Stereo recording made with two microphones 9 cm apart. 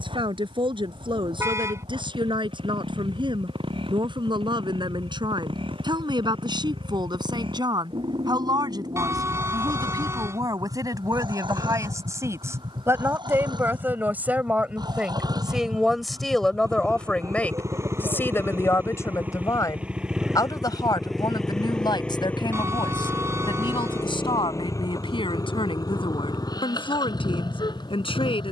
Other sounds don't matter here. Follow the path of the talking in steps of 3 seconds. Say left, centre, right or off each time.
right, right, right, right, right, centre, left, left, left, left.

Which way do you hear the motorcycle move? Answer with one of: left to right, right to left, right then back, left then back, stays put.
right to left.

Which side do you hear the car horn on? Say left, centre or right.
right.